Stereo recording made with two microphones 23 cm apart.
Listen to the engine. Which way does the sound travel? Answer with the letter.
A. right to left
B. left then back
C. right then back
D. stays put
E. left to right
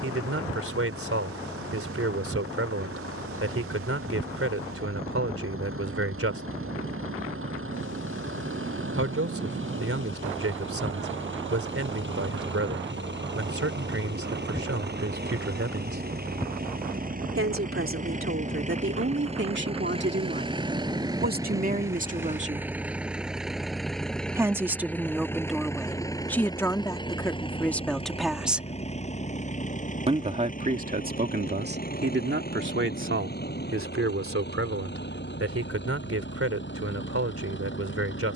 A.